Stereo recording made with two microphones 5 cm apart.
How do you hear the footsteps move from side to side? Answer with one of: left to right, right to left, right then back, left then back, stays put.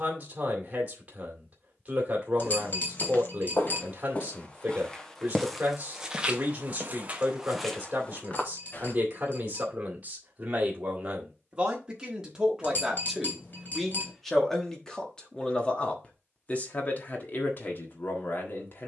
right then back.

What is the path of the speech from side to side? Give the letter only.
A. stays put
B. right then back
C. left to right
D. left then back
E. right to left
E.